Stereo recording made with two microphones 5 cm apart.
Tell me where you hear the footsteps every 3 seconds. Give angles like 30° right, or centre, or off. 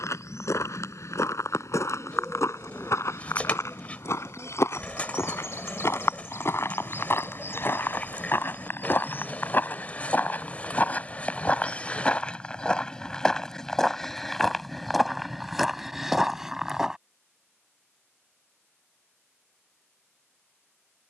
70° left, 70° left, 50° left, 30° left, 10° left, 10° right, off.